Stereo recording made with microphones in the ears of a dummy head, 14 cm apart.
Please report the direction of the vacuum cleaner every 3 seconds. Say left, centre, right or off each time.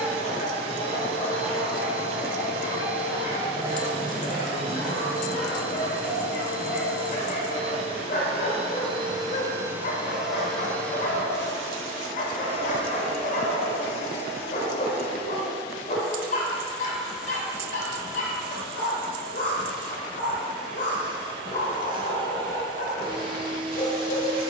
right, right, right, centre, left, centre, right, right.